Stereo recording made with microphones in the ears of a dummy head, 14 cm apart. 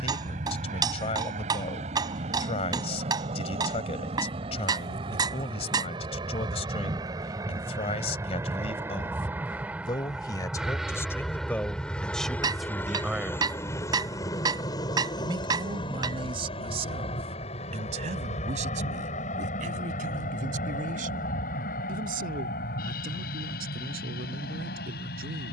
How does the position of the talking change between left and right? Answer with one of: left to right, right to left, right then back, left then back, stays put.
left to right.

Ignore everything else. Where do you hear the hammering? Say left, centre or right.
right.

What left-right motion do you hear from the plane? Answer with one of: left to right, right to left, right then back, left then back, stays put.
right to left.